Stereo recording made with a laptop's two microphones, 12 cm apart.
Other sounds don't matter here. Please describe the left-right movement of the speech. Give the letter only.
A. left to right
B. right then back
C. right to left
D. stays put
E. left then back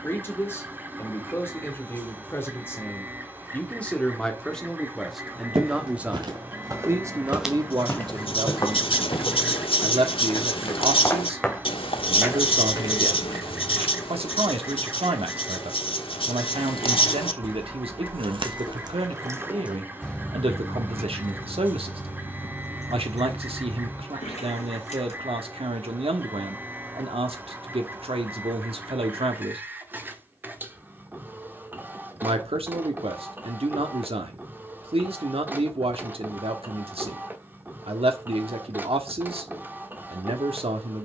A.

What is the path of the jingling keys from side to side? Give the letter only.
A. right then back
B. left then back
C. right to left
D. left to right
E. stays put
C.